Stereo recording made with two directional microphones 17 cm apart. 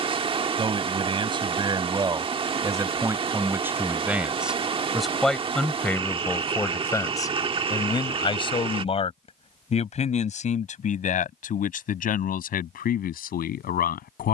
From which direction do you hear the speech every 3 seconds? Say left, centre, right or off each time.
right, centre, left, left, left.